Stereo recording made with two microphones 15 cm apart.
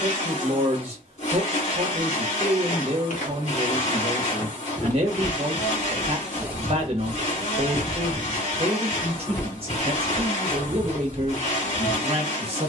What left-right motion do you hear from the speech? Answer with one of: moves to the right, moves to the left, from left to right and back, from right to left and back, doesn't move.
doesn't move.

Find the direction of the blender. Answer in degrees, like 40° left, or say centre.
50° left.